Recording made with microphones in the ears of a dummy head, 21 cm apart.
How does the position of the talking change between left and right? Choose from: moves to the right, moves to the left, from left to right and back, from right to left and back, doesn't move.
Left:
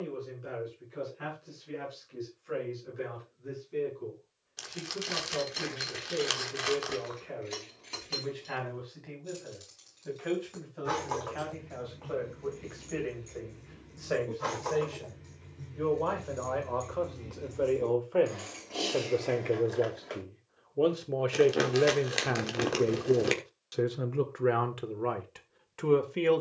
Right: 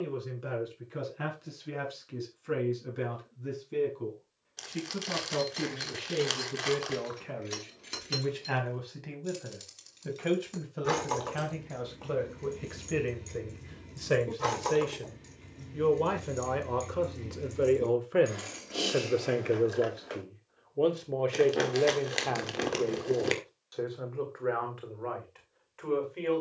moves to the left.